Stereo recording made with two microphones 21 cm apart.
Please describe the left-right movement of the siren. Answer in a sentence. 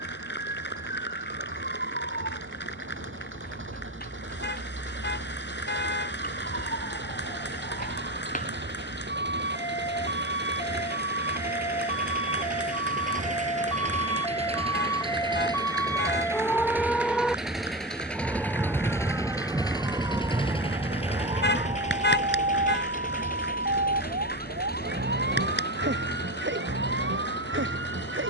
You can hear the siren travel towards the right.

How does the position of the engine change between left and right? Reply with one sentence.
You can hear the engine go from the right side to the left.